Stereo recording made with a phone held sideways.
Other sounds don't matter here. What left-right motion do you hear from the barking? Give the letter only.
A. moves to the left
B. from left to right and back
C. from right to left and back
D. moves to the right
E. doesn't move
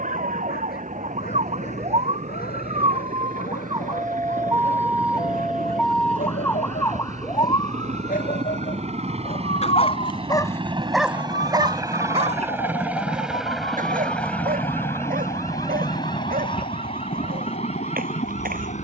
D.